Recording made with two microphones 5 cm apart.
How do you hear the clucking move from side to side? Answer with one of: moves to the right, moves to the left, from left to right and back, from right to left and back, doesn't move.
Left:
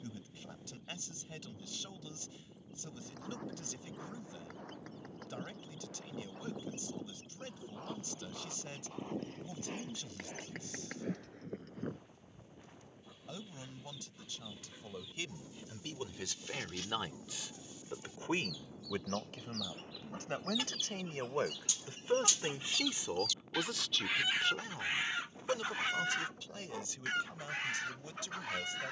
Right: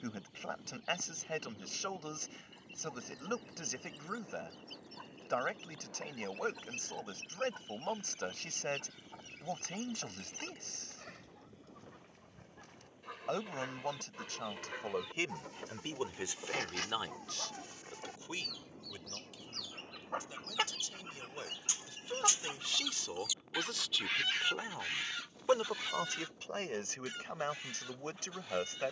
moves to the left.